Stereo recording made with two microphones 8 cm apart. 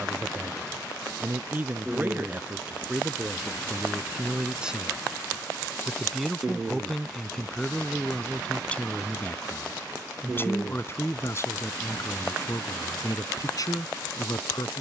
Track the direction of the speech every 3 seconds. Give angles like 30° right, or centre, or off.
20° right, 10° right, 10° left, 30° left, 50° left.